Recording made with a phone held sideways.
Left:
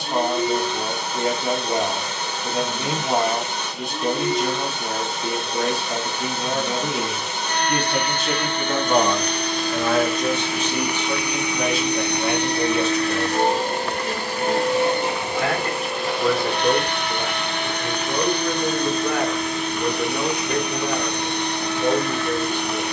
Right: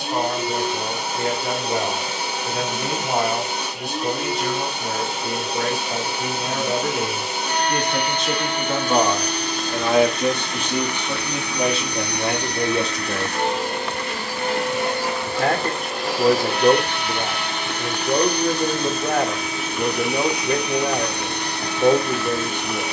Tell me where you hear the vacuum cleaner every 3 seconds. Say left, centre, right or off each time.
centre, centre, centre, centre, left, centre, centre, centre.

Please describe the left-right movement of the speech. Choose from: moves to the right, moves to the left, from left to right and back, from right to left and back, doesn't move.
moves to the right.